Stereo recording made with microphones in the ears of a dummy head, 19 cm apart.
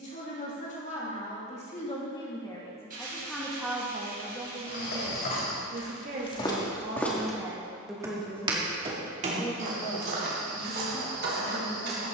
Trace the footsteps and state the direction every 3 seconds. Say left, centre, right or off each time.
off, left, centre, right.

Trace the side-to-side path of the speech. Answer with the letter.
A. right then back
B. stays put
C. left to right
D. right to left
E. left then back
A.